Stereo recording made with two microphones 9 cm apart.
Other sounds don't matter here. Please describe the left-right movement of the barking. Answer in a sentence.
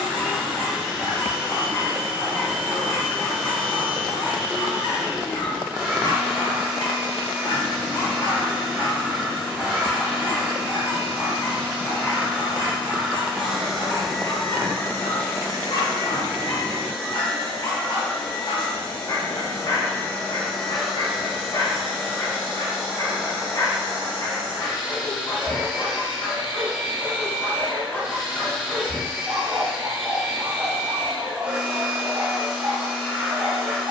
You can hear the barking go from the left side to the right.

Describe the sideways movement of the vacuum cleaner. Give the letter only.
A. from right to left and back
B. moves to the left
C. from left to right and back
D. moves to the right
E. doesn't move
A.